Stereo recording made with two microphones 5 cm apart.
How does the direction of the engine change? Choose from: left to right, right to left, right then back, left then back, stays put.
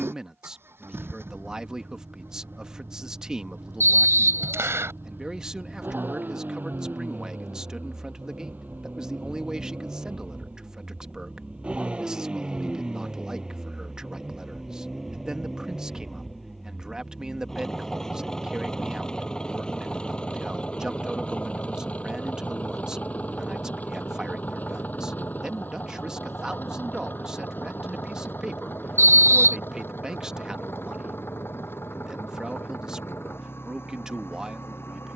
right to left.